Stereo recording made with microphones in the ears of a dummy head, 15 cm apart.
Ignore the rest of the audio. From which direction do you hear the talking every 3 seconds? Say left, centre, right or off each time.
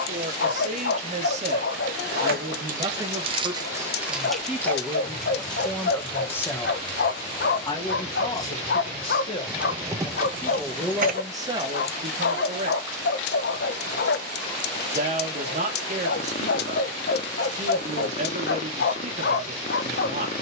right, centre, left, centre, right, right, right.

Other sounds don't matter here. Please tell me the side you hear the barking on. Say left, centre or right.
left.